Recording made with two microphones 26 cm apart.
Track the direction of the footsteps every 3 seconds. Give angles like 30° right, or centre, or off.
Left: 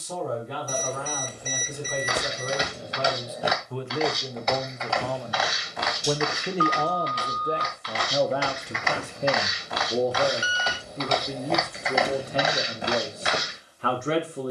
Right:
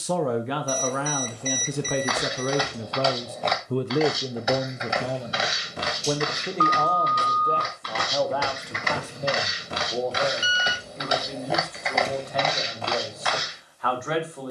30° left, 10° right, 50° right, 20° right, 20° left.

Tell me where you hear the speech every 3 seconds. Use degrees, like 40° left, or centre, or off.
80° right, 30° right, 10° left, 30° left, 30° left.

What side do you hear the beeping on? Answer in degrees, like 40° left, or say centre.
20° left.